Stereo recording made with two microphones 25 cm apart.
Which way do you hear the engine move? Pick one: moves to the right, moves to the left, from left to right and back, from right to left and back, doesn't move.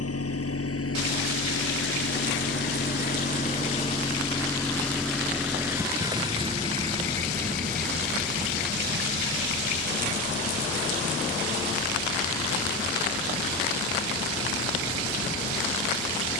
moves to the right.